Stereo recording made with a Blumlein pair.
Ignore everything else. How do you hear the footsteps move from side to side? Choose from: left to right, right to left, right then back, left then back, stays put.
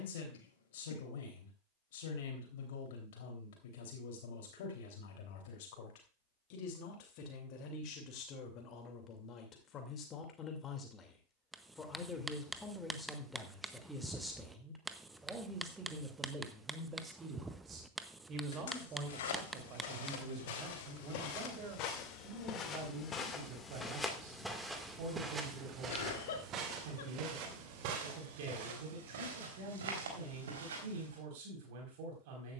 left to right.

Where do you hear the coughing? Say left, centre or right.
left.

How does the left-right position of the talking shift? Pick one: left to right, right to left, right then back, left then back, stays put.
left to right.